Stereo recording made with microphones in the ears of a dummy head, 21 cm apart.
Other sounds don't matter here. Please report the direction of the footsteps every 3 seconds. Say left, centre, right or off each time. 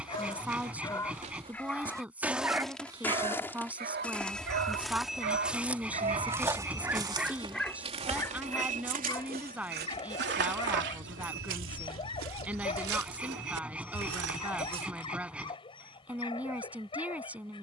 right, centre, right, right, right, off.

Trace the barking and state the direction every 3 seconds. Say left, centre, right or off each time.
centre, right, centre, left, left, left.